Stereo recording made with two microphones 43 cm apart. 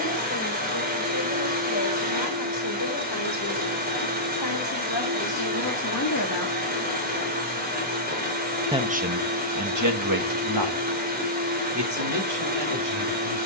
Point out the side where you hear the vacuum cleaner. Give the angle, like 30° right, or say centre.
20° right.